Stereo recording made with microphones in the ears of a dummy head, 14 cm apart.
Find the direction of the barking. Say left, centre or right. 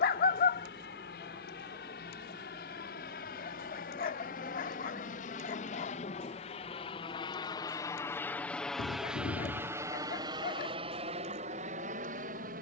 left.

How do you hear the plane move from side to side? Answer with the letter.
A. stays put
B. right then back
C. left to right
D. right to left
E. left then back
C.